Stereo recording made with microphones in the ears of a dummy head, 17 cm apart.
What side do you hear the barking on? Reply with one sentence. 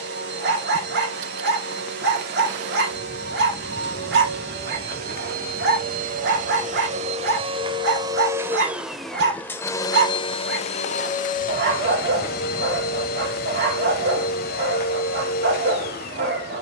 In this clip you hear the barking on the right.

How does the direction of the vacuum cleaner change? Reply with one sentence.
You can hear the vacuum cleaner go from the right side to the left.